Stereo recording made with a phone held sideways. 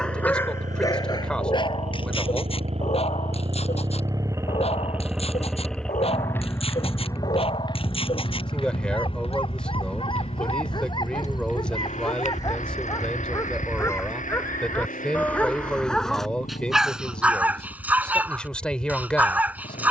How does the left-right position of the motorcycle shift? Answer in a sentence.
In this clip you hear the motorcycle travel towards the left.